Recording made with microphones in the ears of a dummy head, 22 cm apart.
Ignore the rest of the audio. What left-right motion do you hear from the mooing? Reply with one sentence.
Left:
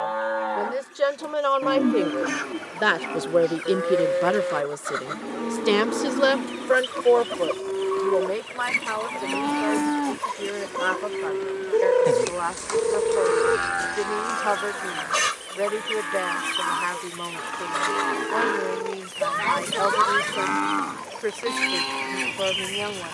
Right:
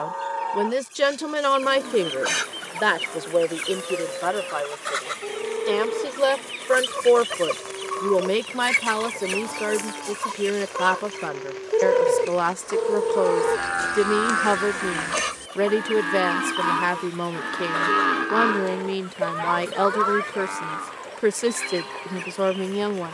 You can hear the mooing move from left to right and back again.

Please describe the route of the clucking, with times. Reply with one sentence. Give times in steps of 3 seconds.
You can hear the clucking on the right from 0 s, in the centre from 9 s and on the left from 15 s.